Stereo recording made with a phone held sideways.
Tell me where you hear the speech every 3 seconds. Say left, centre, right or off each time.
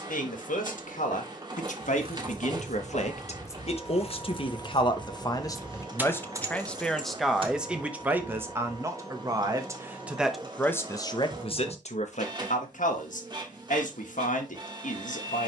left, left, centre, centre, left.